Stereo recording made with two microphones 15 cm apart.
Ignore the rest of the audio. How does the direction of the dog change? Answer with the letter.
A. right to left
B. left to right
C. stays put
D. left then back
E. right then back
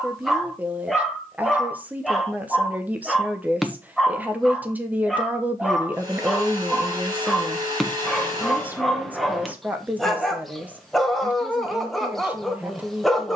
C.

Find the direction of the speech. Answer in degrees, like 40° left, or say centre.
10° right.